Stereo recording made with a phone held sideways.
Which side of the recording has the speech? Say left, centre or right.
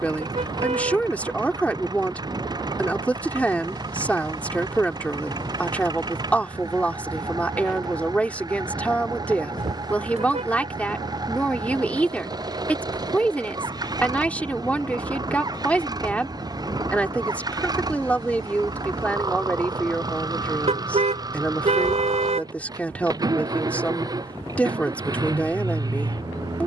centre.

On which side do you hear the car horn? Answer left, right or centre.
right.